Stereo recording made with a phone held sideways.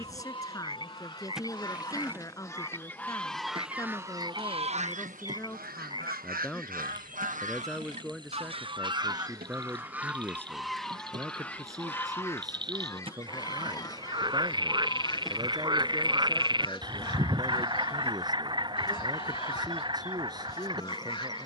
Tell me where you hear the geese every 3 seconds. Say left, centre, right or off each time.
left, right, right, centre, left, left, left.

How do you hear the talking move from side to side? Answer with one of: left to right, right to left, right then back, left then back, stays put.
left to right.